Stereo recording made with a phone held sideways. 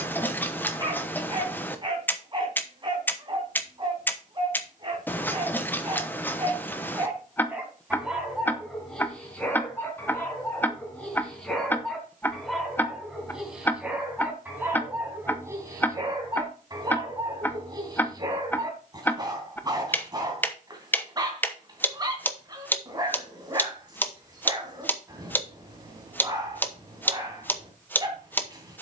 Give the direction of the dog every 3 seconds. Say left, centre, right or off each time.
right, right, centre, centre, centre, right, right, right, right, right.